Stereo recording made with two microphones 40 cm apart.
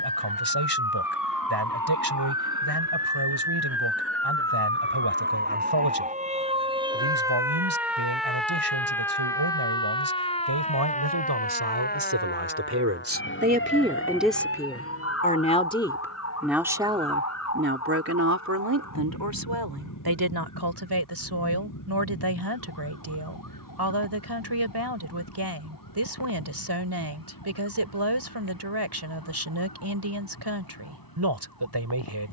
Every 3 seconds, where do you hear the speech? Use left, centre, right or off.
right, right, right, right, right, centre, right, right, right, right, right.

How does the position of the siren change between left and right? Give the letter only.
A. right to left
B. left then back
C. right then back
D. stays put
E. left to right
A.